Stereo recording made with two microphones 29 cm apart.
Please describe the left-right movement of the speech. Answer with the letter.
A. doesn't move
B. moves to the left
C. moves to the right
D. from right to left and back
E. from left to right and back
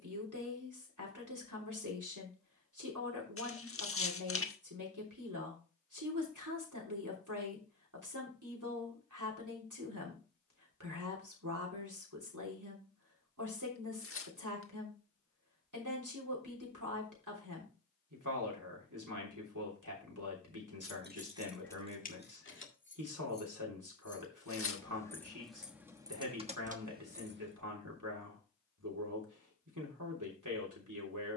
A.